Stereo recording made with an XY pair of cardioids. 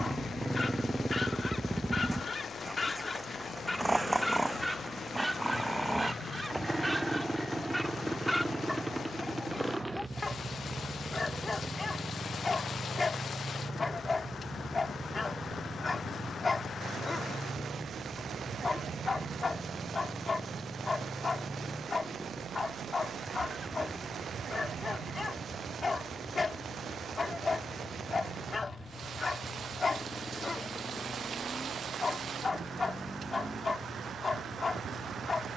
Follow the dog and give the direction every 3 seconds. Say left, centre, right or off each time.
left, centre, centre, left, left, left, left, left, left, left, left, left.